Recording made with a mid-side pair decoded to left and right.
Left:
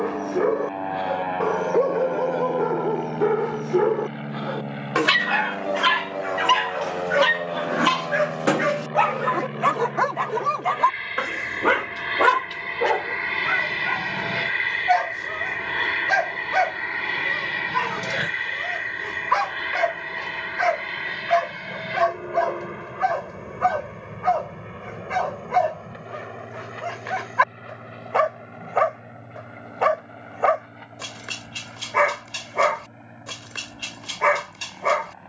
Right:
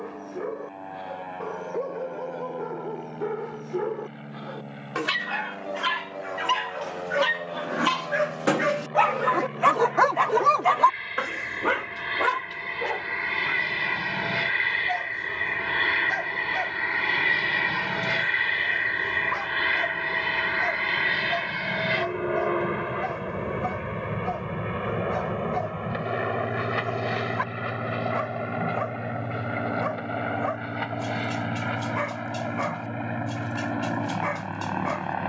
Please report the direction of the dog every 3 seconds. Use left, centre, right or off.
left, left, left, centre, left, left, left, left, left, left, left, left.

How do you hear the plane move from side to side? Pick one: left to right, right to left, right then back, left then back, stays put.
left to right.